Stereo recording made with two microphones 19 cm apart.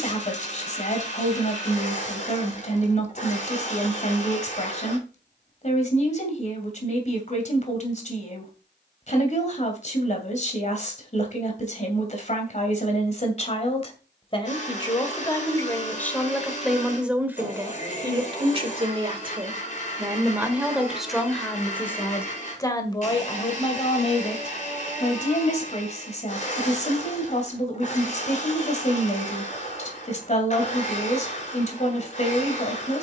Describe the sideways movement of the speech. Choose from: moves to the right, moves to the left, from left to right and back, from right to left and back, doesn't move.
from left to right and back.